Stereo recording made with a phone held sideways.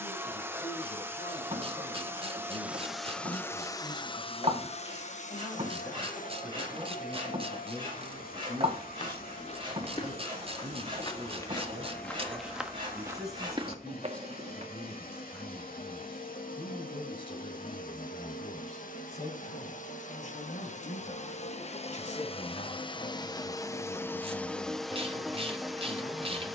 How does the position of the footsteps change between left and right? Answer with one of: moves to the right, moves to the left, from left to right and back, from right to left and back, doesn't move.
moves to the right.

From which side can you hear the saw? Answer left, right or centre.
right.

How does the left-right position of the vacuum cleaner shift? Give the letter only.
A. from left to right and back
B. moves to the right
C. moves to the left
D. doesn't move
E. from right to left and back
E.